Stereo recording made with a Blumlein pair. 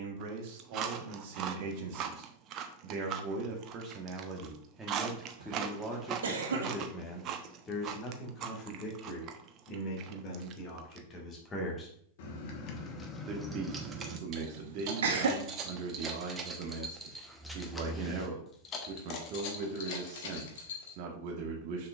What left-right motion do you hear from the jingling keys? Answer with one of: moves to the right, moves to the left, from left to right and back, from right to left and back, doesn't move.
from left to right and back.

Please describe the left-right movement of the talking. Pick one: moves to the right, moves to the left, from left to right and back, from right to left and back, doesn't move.
from right to left and back.